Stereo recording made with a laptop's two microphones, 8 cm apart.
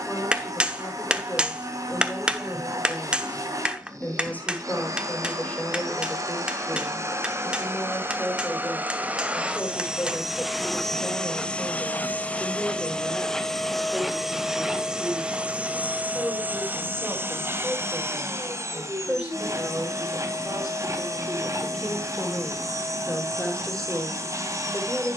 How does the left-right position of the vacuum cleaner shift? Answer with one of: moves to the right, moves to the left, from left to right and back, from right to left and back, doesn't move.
from right to left and back.